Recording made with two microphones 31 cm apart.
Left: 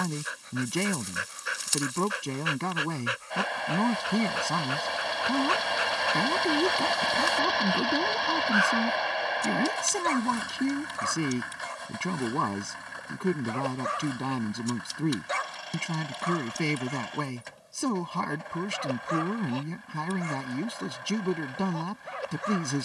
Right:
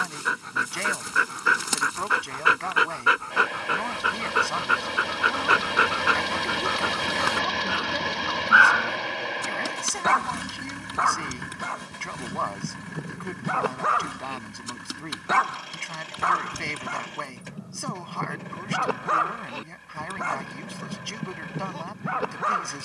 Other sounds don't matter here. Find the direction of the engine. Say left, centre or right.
right.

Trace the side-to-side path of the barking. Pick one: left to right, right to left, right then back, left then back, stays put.
stays put.